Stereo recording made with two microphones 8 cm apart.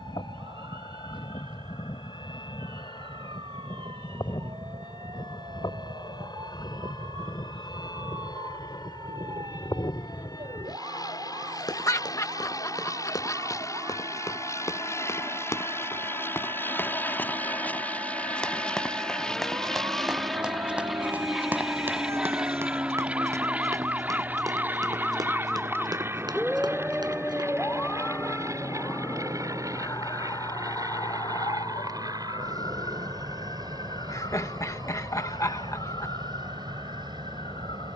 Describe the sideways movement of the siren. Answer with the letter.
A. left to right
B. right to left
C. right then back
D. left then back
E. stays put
B.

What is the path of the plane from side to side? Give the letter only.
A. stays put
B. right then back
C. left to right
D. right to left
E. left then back
C.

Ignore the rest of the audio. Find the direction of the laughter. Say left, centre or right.
left.